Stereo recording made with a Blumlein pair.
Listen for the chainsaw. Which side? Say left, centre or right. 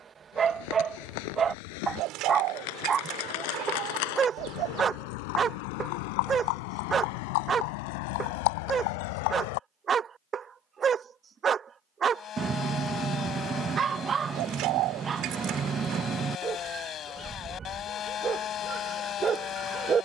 left.